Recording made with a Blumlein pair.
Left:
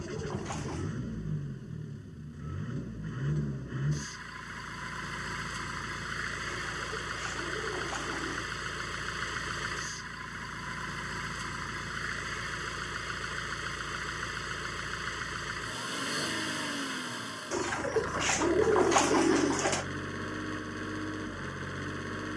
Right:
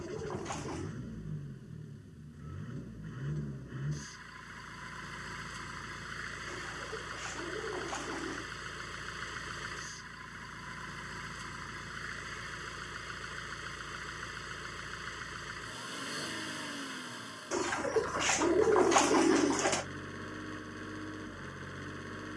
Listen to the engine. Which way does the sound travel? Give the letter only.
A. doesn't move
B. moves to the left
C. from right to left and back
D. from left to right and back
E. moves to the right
A.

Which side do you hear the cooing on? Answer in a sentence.
In this clip you hear the cooing in the centre.